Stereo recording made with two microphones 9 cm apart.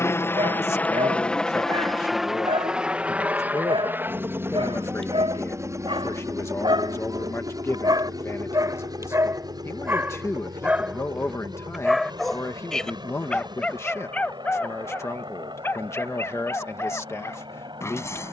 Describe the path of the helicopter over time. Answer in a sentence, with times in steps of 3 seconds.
You can hear the helicopter in the centre from 0 s and on the right from 3 s.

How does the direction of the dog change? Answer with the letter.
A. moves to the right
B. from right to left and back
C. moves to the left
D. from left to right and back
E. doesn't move
C.